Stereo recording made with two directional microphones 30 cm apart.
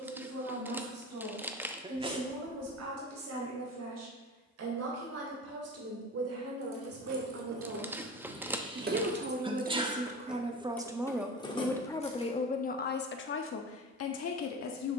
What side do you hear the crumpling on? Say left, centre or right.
centre.